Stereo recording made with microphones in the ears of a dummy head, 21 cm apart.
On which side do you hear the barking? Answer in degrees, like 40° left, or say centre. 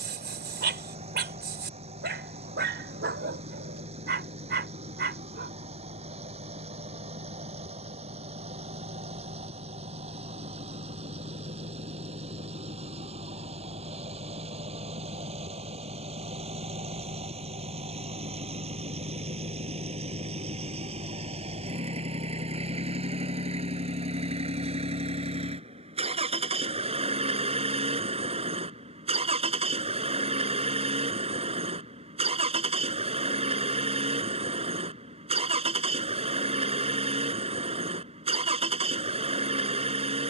50° right.